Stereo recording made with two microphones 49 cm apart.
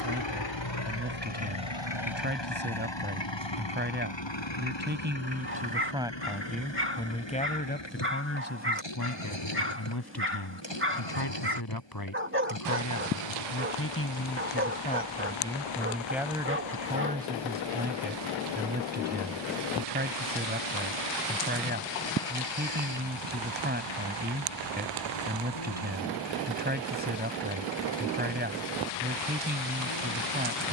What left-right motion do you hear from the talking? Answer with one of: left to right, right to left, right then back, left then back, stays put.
left then back.